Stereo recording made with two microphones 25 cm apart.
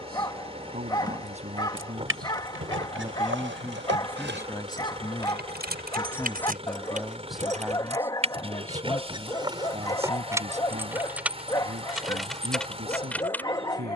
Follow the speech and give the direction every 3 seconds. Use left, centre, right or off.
right, centre, centre, right, right.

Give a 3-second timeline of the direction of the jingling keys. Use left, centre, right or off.
right, right, right, centre, centre.